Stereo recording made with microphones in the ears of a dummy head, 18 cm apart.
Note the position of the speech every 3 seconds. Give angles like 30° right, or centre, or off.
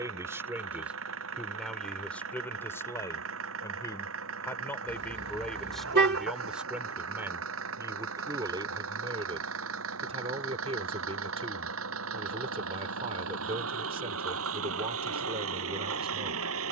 centre, 10° left, 10° right, 30° right, 30° right, 30° right.